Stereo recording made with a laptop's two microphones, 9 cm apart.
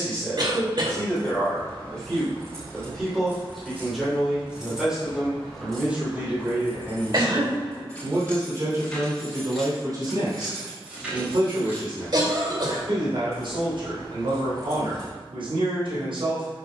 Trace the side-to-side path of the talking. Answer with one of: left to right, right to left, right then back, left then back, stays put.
left to right.